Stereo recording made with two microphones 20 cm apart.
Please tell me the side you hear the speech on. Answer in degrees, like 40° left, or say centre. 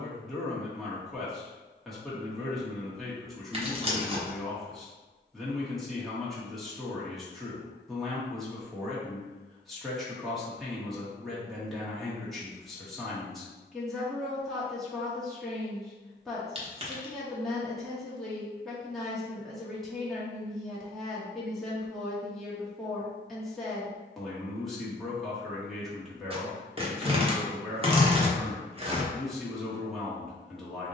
centre.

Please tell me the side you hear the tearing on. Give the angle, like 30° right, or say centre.
30° right.